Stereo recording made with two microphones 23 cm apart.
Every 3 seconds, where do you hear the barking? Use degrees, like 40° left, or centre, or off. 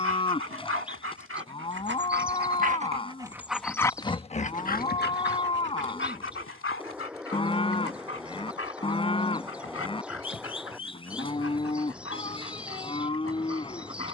50° right, 30° left, 70° left, 80° left, 80° left.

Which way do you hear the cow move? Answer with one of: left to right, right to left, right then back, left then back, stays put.
stays put.